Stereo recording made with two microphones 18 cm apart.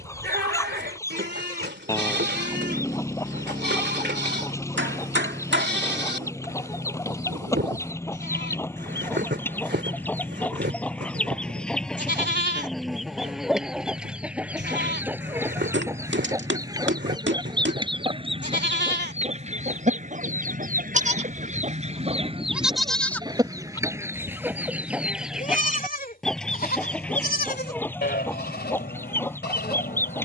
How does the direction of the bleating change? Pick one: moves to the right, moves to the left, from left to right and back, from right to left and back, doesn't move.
moves to the left.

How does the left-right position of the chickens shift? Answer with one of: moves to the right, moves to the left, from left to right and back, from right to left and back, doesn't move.
from left to right and back.